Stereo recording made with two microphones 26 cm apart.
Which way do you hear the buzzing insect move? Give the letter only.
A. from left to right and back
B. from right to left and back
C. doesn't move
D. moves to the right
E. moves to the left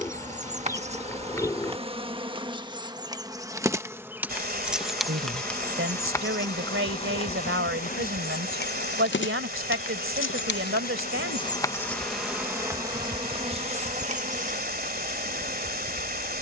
B.